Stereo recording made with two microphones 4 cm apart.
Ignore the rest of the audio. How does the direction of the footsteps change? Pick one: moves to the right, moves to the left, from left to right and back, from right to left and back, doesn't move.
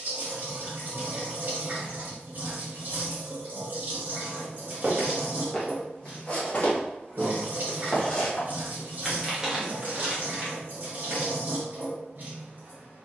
from right to left and back.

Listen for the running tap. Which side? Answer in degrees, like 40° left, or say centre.
50° right.